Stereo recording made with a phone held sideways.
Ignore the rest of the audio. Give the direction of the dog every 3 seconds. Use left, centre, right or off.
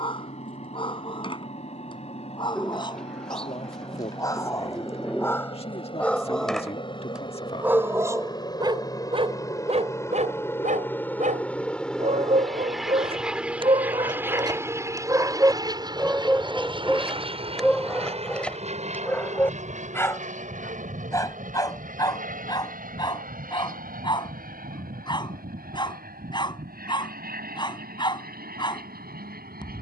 left, left, centre, right, right, centre, centre, left, left, left.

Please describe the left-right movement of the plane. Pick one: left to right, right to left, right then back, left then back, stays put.
left to right.